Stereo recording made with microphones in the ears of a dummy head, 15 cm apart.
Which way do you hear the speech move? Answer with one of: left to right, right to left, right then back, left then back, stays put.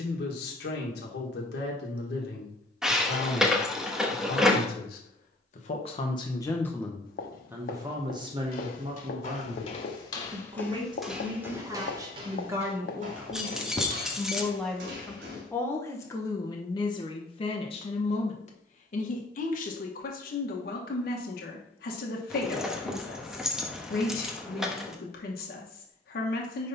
right then back.